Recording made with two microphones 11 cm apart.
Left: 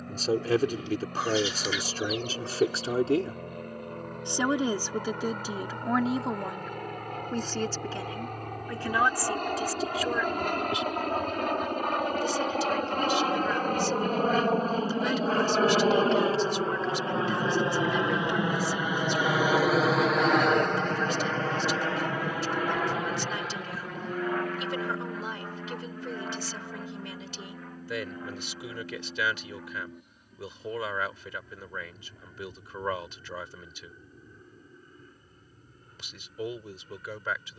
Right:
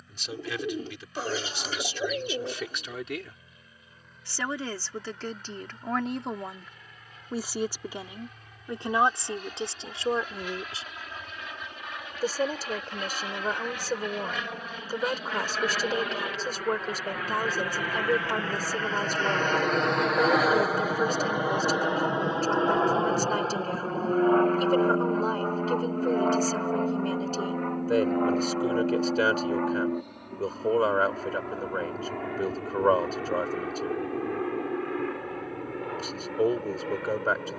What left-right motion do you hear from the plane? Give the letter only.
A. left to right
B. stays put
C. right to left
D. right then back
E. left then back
A.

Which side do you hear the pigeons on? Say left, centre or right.
right.